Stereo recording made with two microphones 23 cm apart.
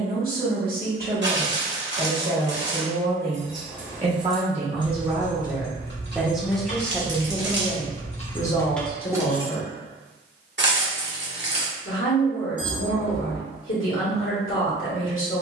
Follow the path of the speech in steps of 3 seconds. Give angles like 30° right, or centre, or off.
40° right, 30° right, 20° left, 50° left, 60° left.